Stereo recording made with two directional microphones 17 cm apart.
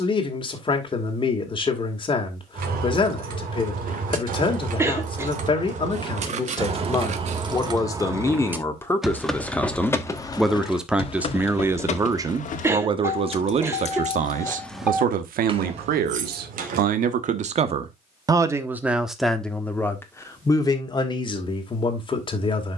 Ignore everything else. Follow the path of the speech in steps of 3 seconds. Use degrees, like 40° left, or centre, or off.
30° left, 30° left, 20° left, centre, 40° right, 50° right, centre, 30° left.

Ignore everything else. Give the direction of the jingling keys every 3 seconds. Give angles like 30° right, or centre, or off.
60° right, 50° right, 30° right, 20° left, 40° left, 40° right, off, off.